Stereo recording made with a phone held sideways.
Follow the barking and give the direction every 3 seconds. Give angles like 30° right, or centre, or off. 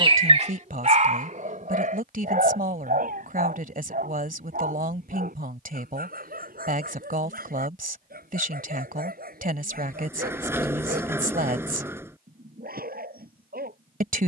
50° right, 70° right, 70° right, 70° right, 70° right.